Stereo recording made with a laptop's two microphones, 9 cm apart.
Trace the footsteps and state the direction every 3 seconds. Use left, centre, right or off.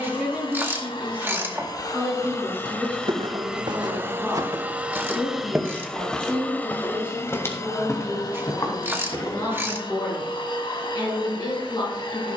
right, right, left, left.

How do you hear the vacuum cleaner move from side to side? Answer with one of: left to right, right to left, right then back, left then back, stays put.
right then back.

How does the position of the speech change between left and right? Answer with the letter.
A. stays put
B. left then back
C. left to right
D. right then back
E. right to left
E.